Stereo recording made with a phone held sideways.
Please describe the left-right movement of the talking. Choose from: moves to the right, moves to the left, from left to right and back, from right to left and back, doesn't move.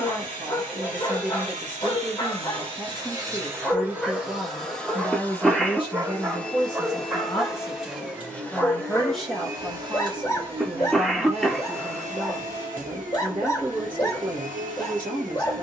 from right to left and back.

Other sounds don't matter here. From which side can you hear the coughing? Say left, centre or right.
centre.